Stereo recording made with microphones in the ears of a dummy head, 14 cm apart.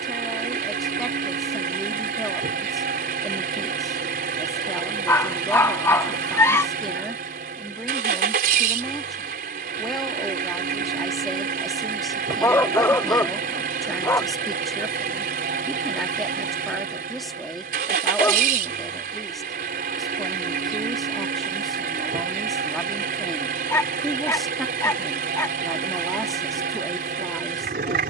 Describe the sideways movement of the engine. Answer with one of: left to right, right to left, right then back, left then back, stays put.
stays put.